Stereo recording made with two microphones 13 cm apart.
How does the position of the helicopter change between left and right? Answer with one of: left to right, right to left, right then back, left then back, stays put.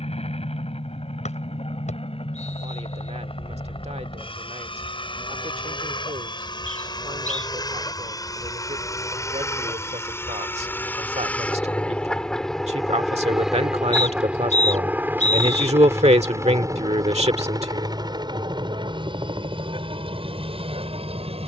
left to right.